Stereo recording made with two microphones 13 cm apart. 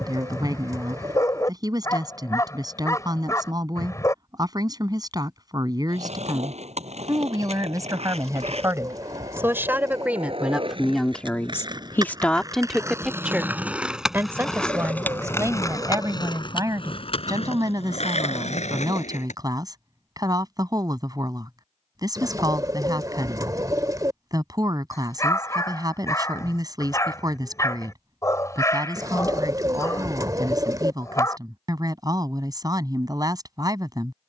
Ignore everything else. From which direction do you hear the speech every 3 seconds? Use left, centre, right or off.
right, right, right, centre, centre, right, right, right, right, right, right, right.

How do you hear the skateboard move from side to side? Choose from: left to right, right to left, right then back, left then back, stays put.
right to left.